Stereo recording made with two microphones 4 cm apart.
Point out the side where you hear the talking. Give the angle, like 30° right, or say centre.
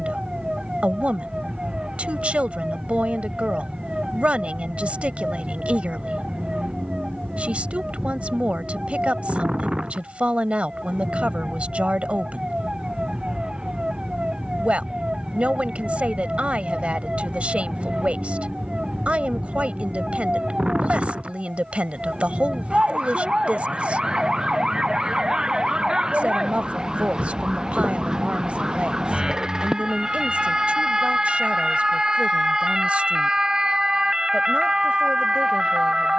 30° right.